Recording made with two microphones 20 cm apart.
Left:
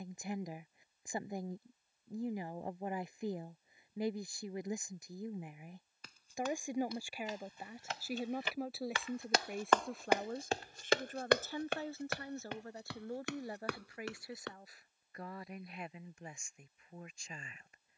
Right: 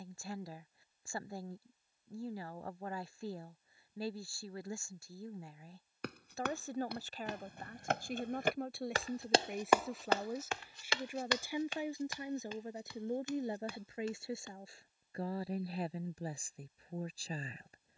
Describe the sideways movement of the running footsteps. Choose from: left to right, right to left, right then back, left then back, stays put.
right to left.